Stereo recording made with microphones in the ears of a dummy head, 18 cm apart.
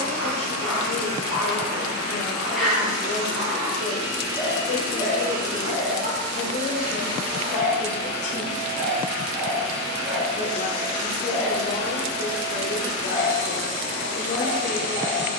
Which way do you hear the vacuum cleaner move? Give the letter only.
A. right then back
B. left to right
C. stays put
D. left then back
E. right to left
C.